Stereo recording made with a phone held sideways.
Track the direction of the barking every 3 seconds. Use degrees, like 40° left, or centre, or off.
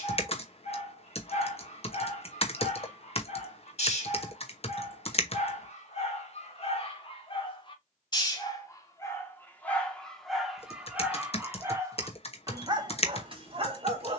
50° left, 50° left, 40° left, centre, 40° right.